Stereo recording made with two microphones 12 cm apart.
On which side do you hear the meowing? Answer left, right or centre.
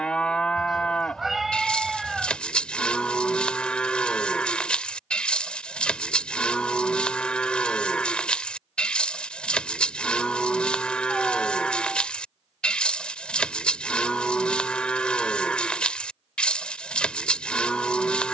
centre.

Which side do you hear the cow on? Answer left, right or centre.
centre.